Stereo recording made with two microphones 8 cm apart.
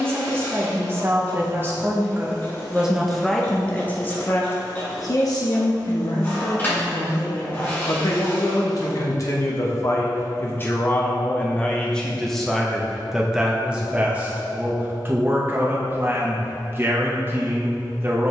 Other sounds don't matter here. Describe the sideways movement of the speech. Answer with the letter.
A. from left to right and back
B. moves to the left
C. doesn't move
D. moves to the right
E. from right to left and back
E.